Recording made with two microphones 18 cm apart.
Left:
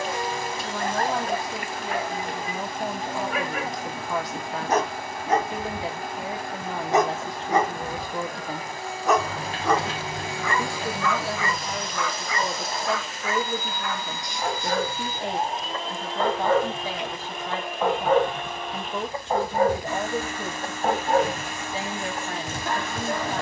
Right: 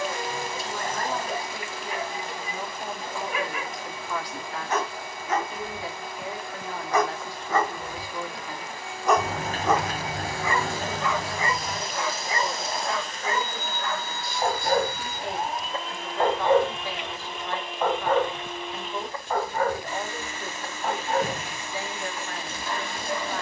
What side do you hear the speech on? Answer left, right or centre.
left.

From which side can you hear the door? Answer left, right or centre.
right.